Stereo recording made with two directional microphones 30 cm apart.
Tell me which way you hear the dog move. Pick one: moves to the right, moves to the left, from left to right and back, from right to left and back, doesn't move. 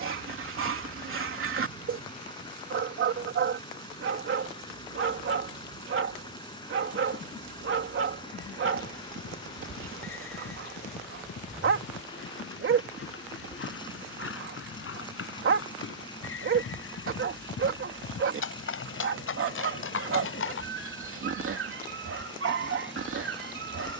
doesn't move.